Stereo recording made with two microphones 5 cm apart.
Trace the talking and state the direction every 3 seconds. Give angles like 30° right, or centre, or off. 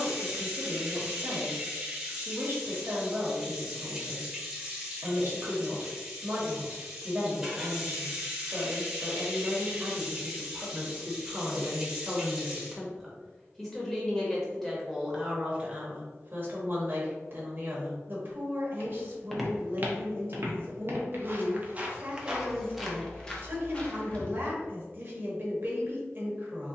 40° right, 40° right, 40° right, 30° right, centre, 30° right, 40° right, 40° right, 40° right.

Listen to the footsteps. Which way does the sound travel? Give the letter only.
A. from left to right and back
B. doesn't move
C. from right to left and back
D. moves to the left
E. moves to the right
A.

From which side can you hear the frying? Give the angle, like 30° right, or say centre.
10° right.